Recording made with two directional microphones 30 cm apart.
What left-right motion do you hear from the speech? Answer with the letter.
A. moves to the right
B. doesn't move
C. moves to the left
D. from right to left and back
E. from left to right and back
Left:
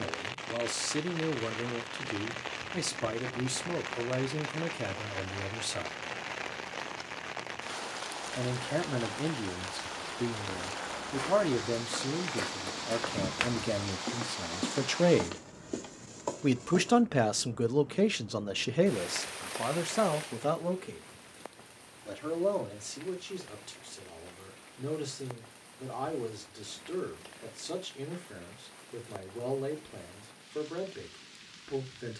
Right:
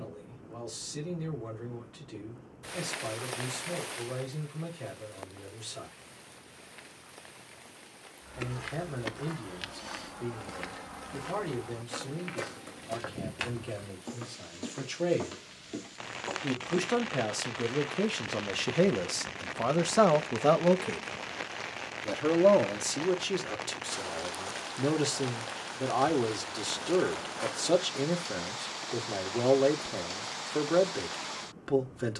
A.